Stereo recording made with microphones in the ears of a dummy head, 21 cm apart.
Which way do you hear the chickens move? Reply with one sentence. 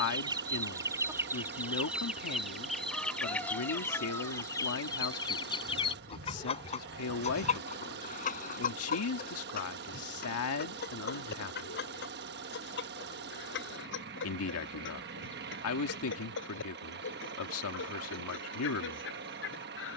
In this clip you hear the chickens move from right to left.